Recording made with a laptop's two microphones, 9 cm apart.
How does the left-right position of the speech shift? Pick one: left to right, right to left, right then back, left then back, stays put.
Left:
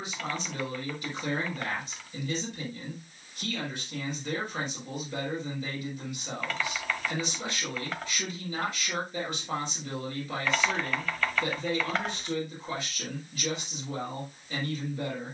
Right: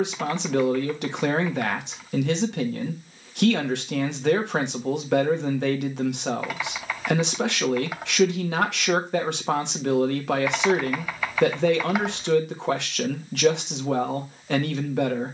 stays put.